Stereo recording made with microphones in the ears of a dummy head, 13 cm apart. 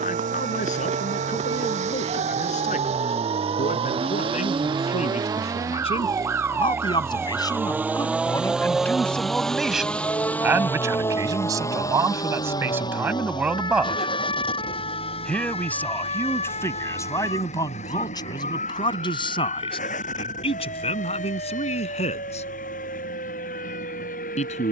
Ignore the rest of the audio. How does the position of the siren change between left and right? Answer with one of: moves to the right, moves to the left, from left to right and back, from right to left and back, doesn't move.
moves to the left.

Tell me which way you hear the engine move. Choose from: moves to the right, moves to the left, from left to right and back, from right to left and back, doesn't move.
moves to the left.